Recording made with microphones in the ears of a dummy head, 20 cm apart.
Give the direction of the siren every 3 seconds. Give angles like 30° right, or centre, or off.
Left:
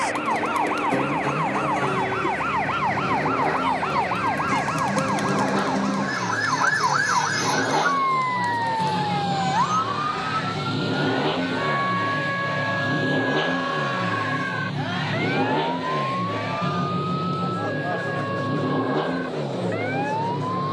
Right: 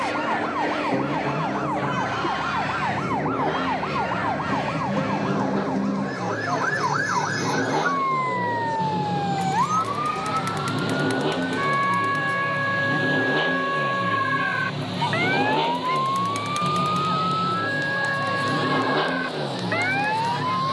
70° left, 60° left, 30° left, 10° right, 30° right, 40° right, 50° right.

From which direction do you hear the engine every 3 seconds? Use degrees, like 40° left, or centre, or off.
50° left, 40° left, 30° left, 10° left, 10° right, 30° right, 50° right.